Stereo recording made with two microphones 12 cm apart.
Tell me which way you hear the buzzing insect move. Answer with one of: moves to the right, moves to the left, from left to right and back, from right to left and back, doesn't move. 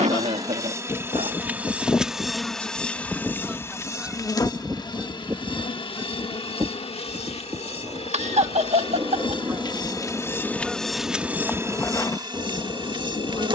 from right to left and back.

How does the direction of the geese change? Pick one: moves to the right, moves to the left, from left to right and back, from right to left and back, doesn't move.
from left to right and back.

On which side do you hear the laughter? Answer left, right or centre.
right.